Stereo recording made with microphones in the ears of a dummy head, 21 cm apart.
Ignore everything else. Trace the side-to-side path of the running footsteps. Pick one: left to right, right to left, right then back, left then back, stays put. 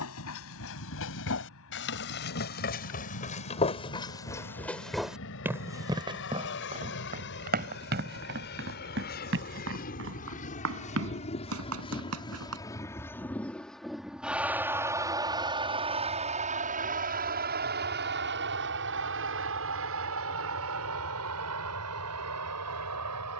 left to right.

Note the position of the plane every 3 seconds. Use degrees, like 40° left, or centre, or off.
60° left, 60° left, 50° left, 30° left, centre, 30° right, 50° right, 60° right.